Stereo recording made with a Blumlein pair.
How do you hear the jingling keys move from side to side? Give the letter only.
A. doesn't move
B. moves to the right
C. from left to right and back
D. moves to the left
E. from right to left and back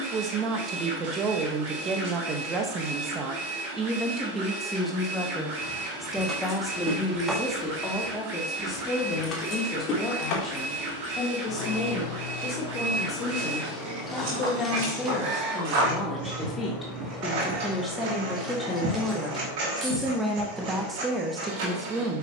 E.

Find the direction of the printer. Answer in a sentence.
In this clip you hear the printer on the right.